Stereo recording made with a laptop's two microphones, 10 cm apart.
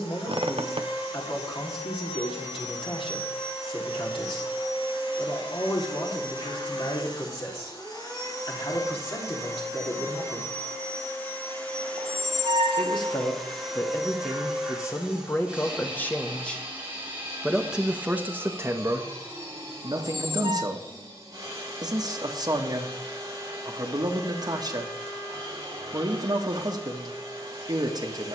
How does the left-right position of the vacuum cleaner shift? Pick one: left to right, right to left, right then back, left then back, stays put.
left to right.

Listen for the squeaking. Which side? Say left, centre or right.
right.